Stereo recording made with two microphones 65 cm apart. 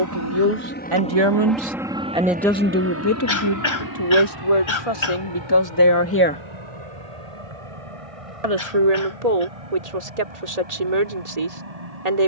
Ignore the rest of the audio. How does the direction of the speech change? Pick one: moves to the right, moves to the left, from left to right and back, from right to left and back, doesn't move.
from right to left and back.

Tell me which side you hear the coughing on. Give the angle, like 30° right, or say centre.
50° left.